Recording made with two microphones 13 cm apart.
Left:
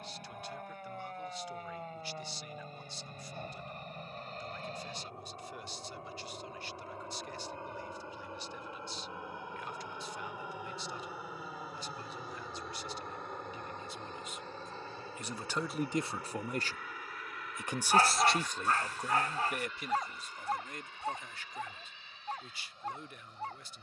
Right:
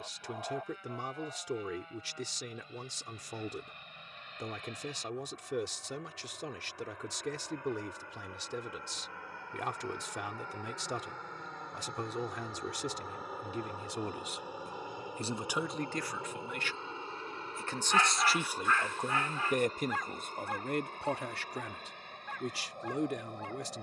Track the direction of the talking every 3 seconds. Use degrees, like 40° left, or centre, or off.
80° right, 80° right, 80° right, 80° right, 70° right, 10° left, 30° right, 70° right.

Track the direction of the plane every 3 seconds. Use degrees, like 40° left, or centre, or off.
50° left, 40° left, 30° left, 10° left, 10° right, 20° right, 40° right, 50° right.